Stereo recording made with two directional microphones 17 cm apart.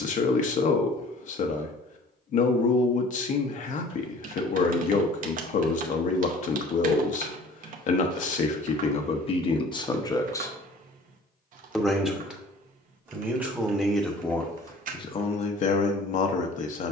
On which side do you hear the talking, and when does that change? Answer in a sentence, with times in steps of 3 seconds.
In this clip you hear the talking on the left from 0 s, in the centre from 12 s and on the left from 15 s.